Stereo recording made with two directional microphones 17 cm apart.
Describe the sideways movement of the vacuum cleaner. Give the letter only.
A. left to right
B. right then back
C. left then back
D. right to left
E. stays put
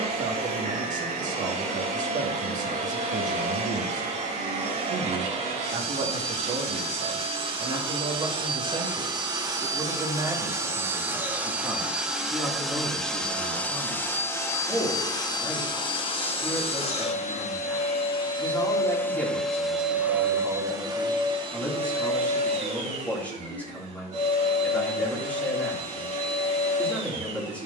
C.